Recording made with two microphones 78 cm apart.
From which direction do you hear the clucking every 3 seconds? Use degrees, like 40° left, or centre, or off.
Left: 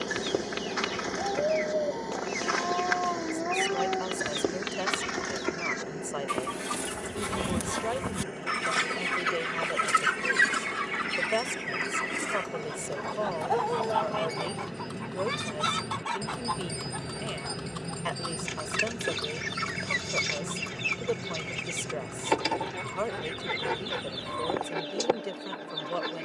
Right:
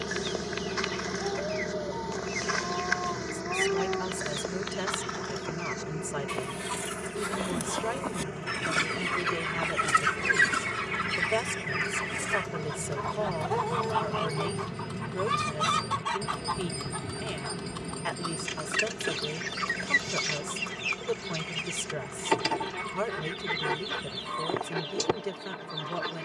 80° left, 80° left, 50° left, centre, 40° right, 40° right, 40° right, 40° right, 40° right.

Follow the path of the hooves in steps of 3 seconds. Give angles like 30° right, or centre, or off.
off, off, off, 50° right, 40° right, centre, 40° left, 60° left, 70° left.